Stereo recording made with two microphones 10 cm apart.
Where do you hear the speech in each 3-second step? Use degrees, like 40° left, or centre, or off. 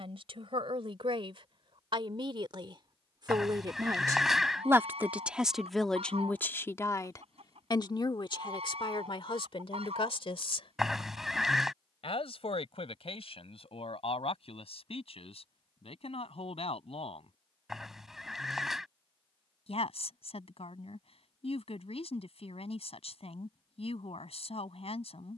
60° right, 20° right, 40° left, 60° left, 80° left, 80° left, 80° left, 80° left, 80° left.